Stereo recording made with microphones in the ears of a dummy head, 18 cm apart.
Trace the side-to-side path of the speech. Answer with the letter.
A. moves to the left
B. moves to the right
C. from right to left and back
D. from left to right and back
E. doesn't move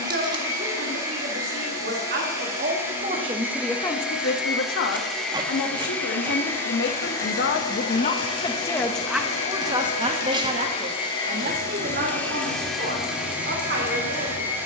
C.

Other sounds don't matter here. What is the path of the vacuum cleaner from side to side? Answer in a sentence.
In this clip you hear the vacuum cleaner go left and come back.